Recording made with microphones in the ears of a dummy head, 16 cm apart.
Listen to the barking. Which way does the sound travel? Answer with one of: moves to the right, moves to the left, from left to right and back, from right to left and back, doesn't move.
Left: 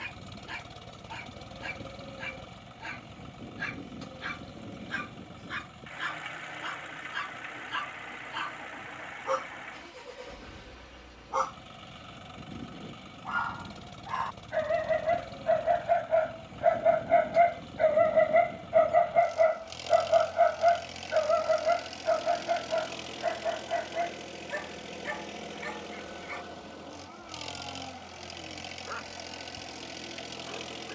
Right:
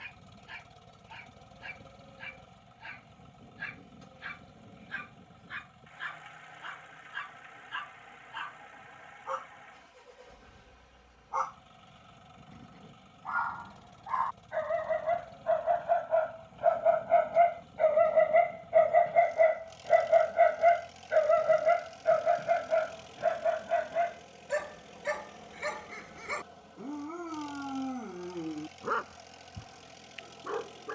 moves to the right.